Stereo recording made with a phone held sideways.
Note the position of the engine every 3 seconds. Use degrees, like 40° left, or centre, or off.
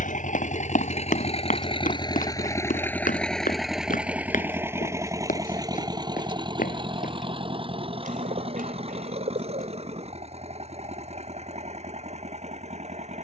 40° left, 10° right, 40° right, 50° right, 50° right.